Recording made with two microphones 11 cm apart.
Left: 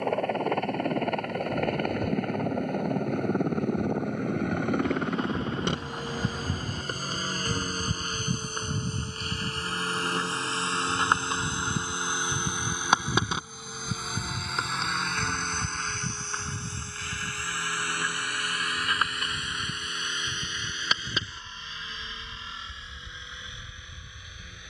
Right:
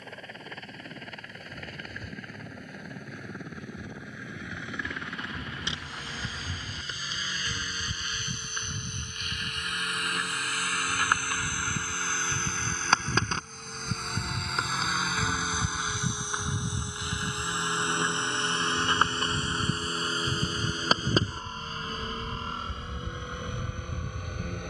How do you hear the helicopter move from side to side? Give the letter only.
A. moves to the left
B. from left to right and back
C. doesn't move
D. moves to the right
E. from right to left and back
D.